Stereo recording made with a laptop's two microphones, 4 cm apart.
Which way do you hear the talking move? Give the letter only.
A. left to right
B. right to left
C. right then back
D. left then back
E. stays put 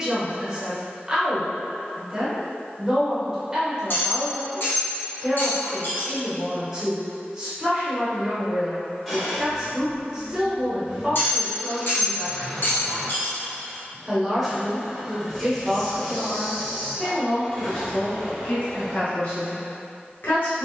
B.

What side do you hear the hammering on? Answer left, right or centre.
left.